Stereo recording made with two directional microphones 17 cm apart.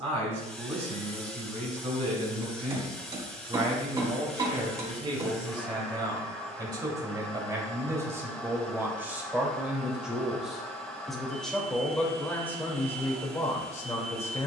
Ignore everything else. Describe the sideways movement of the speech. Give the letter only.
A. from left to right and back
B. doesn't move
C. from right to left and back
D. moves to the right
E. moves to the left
E.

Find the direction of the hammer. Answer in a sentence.
In this clip you hear the hammer on the right.